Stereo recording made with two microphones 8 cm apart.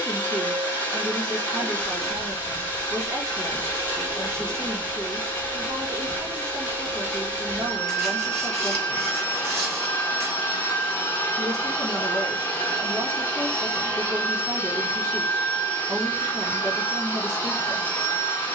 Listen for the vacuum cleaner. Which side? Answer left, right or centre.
left.